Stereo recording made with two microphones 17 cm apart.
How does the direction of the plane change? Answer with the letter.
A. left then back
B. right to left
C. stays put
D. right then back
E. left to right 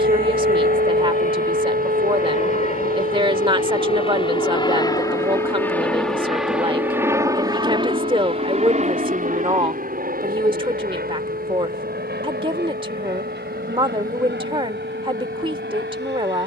E.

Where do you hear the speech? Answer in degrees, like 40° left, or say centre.
30° right.